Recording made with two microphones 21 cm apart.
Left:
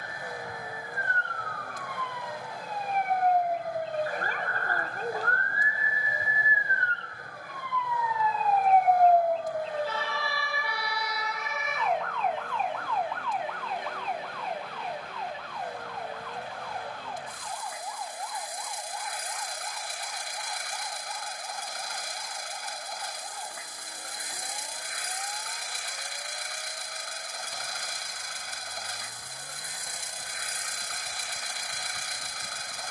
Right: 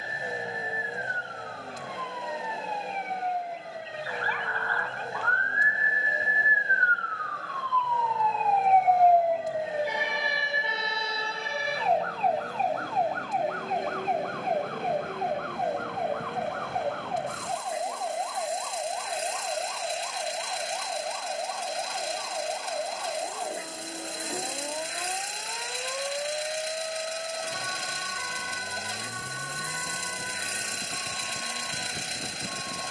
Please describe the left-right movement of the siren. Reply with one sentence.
In this clip you hear the siren travel towards the right.